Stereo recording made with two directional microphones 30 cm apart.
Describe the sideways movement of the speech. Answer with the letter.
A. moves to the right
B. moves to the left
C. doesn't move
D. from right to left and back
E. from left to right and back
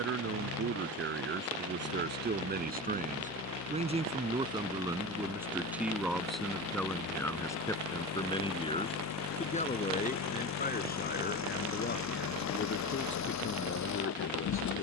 B.